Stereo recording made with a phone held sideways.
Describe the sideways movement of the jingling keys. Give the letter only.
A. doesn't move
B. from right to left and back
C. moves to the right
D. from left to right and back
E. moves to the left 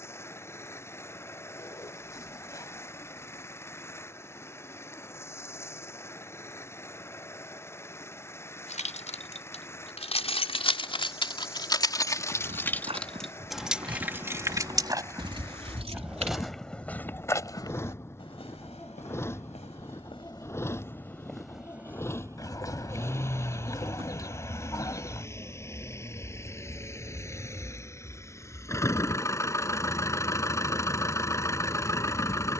C.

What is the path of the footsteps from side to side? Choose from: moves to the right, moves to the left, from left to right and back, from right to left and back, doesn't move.
from right to left and back.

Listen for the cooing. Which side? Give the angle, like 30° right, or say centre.
20° left.